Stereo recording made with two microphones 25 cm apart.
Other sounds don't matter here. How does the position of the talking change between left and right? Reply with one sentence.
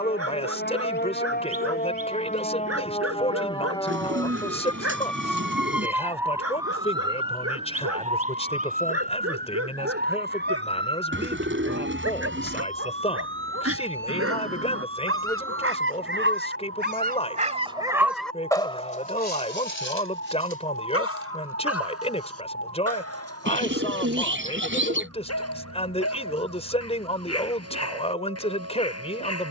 In this clip you hear the talking stay in one place.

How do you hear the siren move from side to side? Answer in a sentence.
You can hear the siren travel towards the right.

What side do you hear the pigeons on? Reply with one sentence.
In this clip you hear the pigeons on the right.